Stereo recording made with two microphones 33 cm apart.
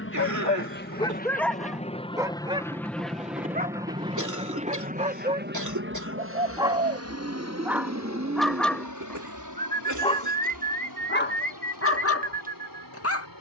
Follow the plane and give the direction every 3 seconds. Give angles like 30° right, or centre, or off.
20° left, 20° right, 40° right, 60° right, 60° right.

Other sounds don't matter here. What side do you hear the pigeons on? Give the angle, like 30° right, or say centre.
20° right.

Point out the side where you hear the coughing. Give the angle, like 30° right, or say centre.
60° right.